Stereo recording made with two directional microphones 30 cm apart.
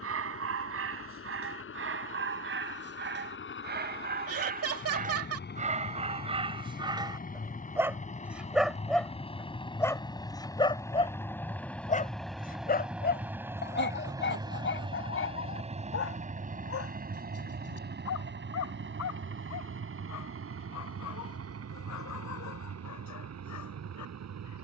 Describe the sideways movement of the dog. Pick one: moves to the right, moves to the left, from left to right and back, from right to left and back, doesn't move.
moves to the left.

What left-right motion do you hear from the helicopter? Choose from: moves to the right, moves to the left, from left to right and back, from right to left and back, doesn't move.
moves to the right.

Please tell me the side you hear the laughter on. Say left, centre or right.
right.